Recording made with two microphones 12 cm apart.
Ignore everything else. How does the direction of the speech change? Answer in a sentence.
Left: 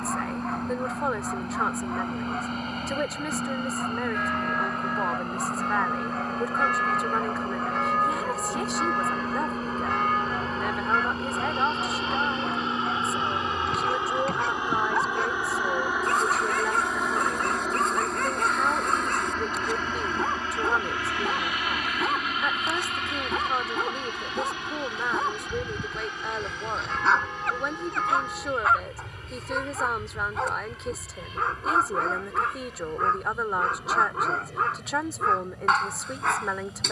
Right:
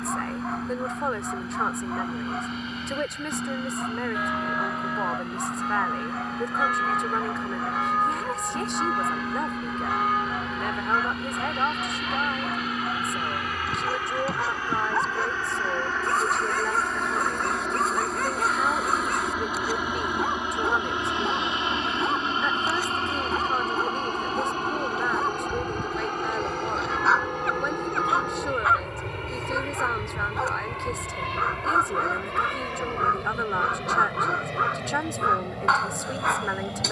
You can hear the speech stay put.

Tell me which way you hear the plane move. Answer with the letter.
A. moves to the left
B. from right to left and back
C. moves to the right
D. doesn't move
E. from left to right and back
C.